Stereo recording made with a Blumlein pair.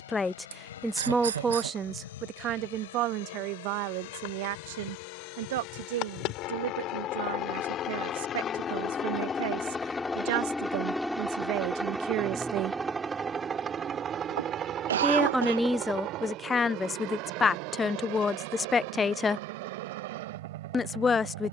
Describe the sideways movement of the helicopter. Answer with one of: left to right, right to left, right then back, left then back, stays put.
left to right.